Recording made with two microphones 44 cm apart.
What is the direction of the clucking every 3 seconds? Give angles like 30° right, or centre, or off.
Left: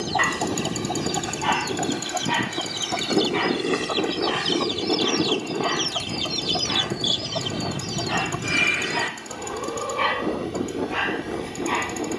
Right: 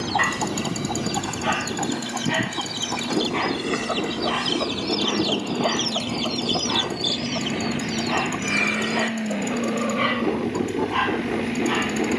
10° right, 10° left, 50° left, centre.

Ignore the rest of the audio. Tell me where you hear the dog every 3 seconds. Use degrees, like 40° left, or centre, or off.
10° left, 30° left, 30° left, centre.